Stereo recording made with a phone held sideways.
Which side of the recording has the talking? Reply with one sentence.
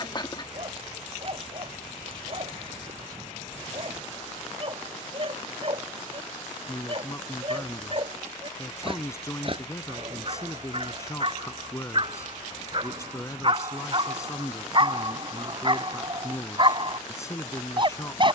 In this clip you hear the talking on the left.